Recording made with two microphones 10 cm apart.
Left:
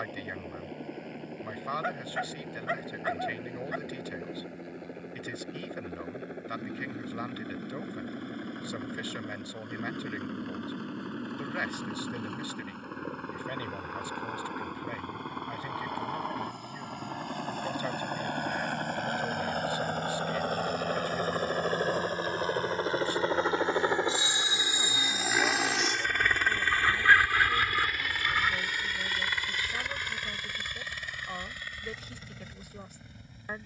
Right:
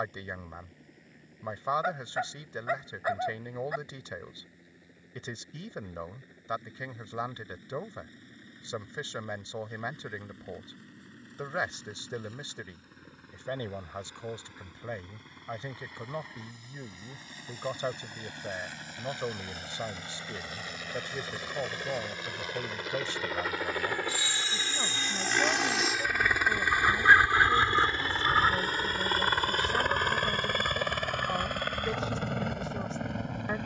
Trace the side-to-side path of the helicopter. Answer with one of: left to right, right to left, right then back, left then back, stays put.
left to right.